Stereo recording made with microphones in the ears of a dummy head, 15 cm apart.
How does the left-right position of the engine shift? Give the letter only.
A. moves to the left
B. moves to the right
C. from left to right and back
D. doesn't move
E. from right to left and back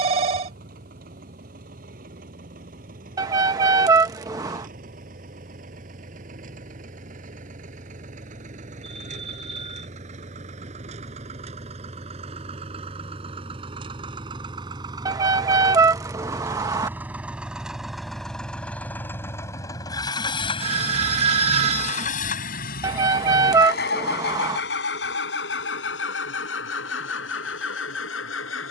A.